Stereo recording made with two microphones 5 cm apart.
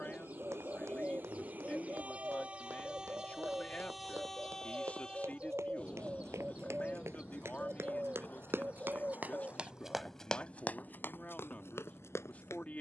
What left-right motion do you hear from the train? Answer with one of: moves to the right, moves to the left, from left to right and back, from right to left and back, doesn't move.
moves to the left.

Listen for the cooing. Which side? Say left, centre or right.
right.